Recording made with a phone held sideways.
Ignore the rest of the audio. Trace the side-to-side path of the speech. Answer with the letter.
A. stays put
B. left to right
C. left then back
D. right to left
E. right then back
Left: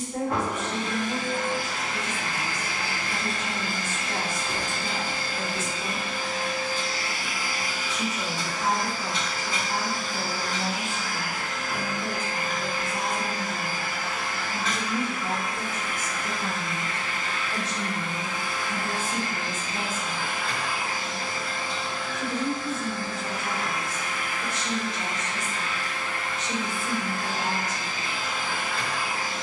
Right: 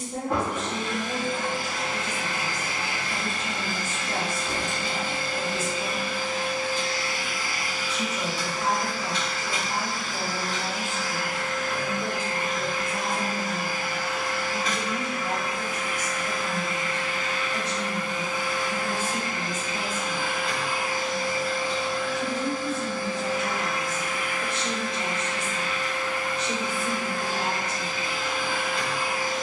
C.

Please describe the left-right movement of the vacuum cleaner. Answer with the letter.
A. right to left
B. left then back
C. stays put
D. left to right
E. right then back
B.